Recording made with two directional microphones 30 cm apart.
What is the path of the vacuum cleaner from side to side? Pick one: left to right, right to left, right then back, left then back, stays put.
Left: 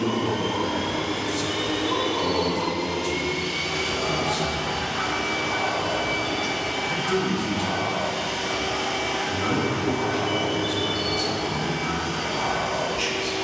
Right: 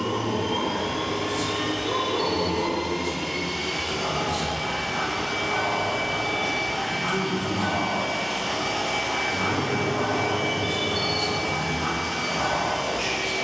left to right.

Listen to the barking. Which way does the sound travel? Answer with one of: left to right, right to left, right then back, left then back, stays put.
left to right.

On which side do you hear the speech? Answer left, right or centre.
left.